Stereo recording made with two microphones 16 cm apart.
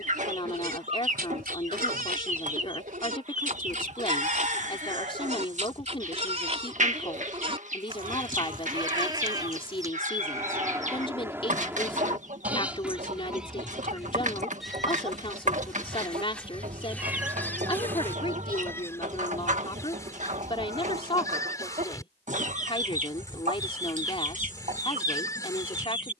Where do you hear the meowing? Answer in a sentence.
In this clip you hear the meowing in the centre.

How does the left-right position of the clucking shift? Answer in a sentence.
You can hear the clucking stay in one place.